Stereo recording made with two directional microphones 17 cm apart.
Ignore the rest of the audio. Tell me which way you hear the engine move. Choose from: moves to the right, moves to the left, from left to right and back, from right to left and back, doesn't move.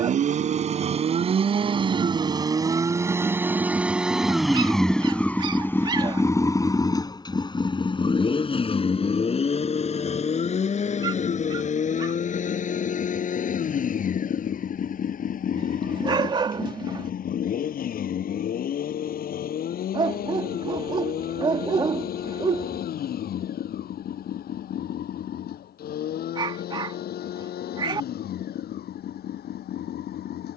moves to the left.